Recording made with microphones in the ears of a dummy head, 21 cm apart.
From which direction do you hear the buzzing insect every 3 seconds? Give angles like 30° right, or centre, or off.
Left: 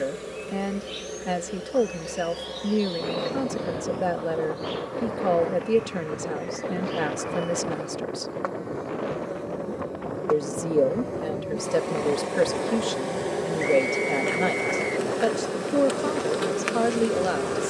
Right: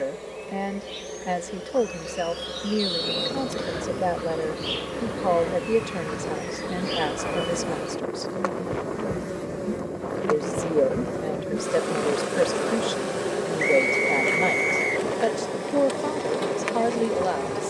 centre, 30° right, 50° right, 30° right, centre, 10° left.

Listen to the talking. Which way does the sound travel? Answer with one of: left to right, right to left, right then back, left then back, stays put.
stays put.